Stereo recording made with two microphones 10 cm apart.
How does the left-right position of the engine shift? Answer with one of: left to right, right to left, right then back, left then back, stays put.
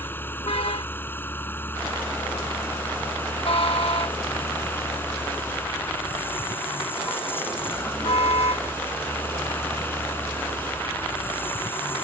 stays put.